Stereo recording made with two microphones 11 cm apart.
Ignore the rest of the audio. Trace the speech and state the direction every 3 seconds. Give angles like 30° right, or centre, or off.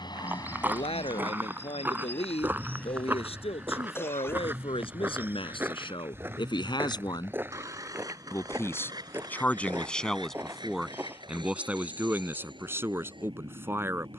70° left, 60° left, 40° left, centre, 20° right.